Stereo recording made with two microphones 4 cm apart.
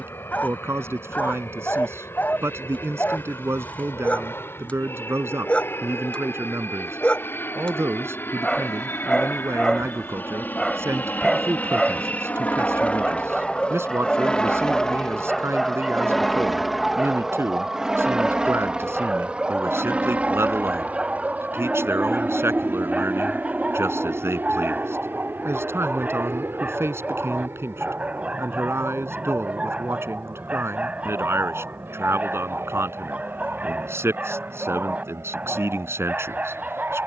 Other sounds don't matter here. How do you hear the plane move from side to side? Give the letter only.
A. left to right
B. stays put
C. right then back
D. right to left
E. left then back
A.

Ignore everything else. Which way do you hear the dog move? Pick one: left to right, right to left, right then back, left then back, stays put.
left to right.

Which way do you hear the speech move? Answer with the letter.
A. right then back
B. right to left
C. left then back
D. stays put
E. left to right
D.